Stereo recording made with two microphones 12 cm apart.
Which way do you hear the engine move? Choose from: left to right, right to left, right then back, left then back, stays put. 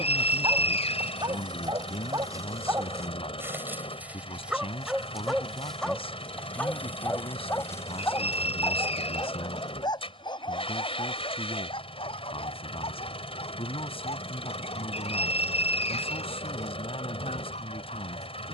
stays put.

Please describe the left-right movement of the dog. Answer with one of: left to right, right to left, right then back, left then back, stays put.
right to left.